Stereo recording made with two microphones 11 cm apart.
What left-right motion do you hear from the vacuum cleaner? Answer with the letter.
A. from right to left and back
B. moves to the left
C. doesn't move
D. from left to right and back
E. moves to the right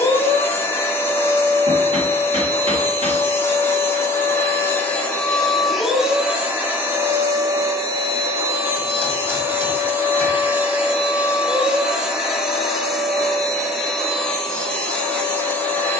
D.